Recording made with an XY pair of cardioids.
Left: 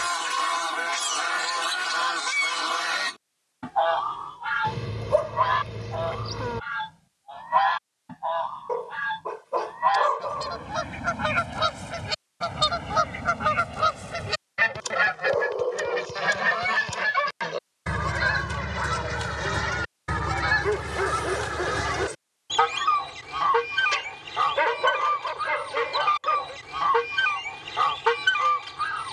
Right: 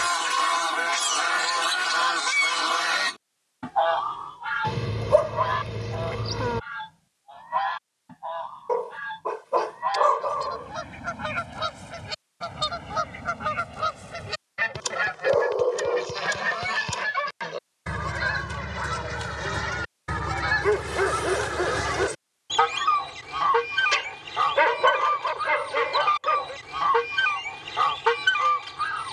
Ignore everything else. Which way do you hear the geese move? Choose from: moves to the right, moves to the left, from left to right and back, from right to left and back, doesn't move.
from right to left and back.